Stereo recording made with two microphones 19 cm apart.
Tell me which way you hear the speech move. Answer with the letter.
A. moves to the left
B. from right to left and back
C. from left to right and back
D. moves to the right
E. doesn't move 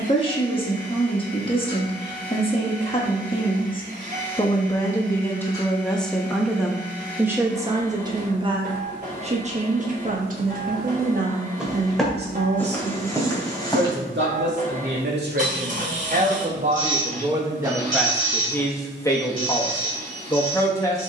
C.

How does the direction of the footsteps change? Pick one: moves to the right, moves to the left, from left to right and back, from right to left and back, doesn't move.
moves to the left.